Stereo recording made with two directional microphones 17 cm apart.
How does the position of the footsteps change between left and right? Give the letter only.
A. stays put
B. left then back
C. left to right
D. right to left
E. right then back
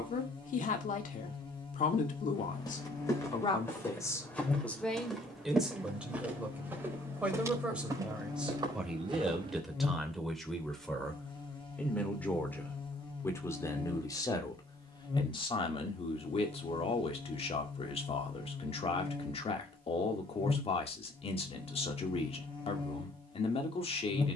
C.